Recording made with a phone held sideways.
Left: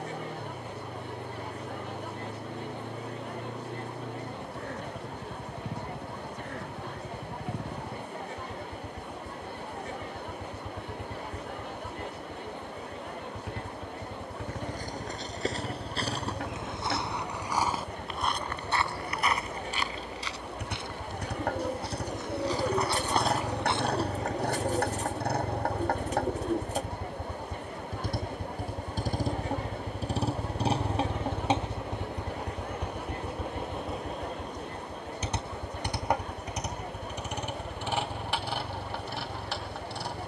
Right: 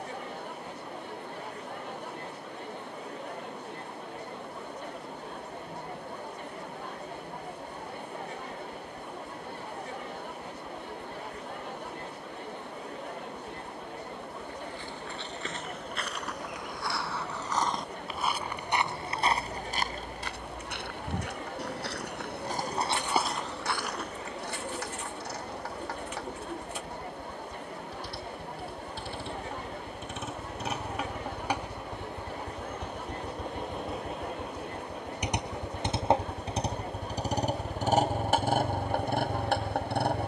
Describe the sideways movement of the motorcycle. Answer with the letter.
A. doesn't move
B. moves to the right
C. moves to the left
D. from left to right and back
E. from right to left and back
B.